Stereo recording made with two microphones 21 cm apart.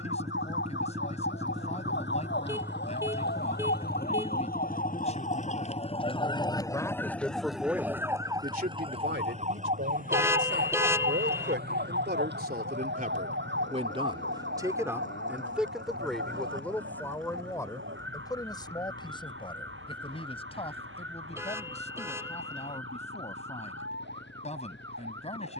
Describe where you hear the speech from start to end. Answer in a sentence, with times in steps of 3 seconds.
You can hear the speech on the left from 0 s, in the centre from 6 s, on the right from 9 s, in the centre from 15 s and on the left from 18 s.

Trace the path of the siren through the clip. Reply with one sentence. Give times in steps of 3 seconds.
In this clip you hear the siren on the left from 0 s, in the centre from 6 s and on the right from 9 s.